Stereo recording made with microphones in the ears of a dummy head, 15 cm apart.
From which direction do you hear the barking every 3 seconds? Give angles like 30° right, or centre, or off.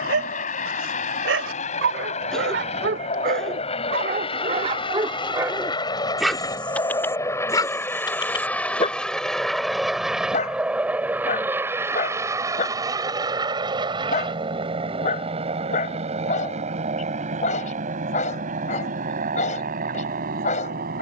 70° right, 40° right, 20° left, 40° left, 40° left, 40° left, 40° left.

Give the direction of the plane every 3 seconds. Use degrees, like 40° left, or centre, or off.
50° left, 30° left, 20° left, 10° right, 30° right, 40° right, 50° right.